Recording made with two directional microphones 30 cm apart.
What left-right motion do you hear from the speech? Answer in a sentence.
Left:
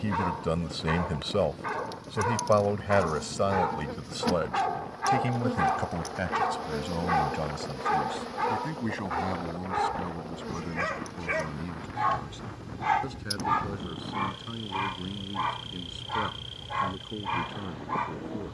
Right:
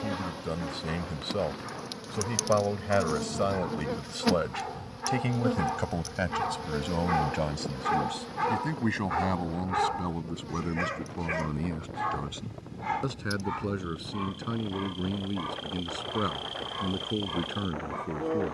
In this clip you hear the speech move from left to right.